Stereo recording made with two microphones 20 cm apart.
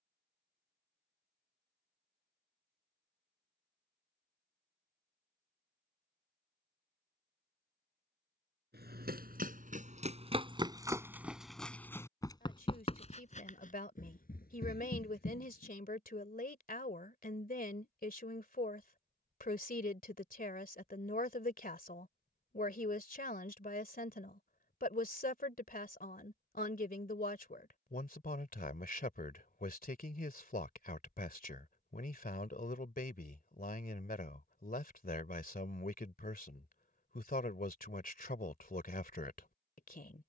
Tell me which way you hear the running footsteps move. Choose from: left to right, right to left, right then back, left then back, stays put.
right to left.